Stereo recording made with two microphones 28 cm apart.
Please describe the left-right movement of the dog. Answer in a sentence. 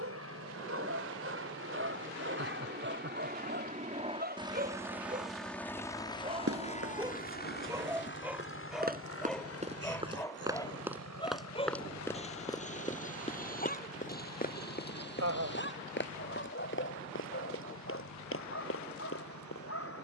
In this clip you hear the dog travel towards the left.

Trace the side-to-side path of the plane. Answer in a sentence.
In this clip you hear the plane move to the left.